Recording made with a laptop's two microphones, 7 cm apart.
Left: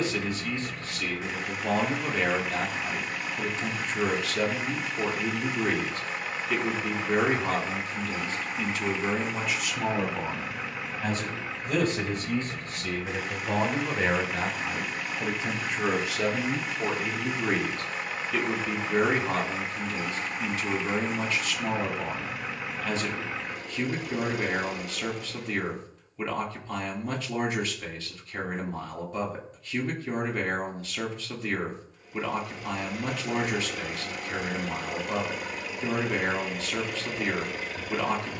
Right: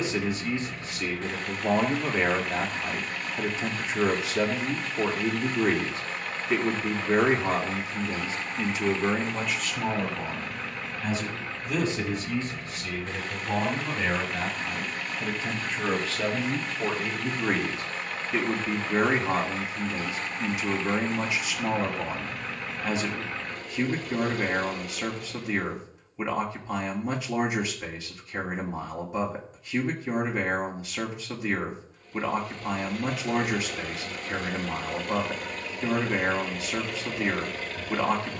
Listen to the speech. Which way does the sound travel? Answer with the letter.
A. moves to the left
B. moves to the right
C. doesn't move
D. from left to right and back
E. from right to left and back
E.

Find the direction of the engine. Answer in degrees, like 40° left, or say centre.
10° left.